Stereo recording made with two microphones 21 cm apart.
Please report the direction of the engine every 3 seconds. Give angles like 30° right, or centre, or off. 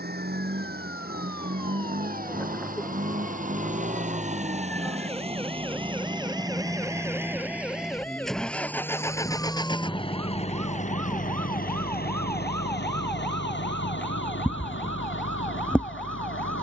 50° right, 30° right, 10° right, 30° left, 60° left, 70° left.